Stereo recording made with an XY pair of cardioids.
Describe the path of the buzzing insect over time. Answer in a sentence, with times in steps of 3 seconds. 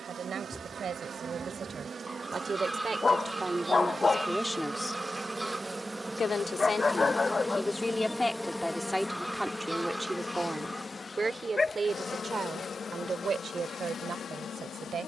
You can hear the buzzing insect on the right from 0 s, in the centre from 6 s and on the left from 9 s.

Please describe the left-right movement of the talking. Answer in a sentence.
In this clip you hear the talking go left and come back.